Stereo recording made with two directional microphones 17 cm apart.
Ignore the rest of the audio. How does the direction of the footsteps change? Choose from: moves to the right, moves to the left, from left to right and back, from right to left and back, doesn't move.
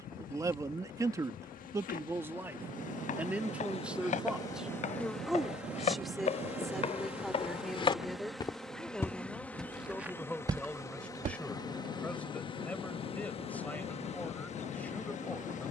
moves to the right.